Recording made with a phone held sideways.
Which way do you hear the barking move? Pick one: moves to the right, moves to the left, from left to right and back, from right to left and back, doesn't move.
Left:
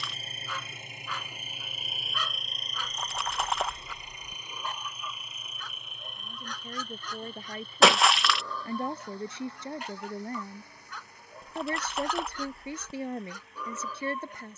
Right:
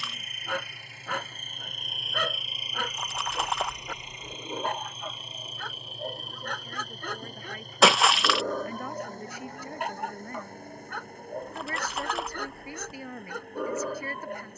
doesn't move.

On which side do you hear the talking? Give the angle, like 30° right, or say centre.
30° left.